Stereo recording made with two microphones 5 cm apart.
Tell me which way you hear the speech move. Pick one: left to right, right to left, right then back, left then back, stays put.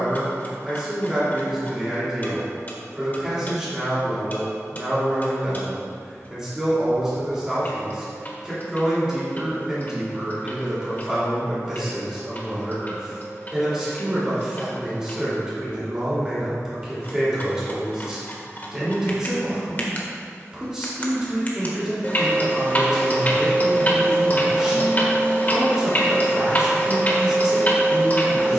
stays put.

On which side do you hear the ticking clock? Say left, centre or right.
left.